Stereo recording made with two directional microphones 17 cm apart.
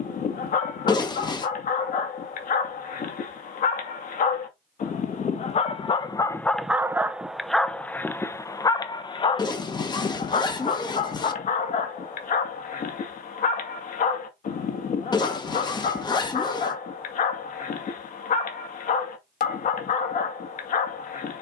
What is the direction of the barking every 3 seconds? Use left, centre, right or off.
left, left, centre, left, left, left, left.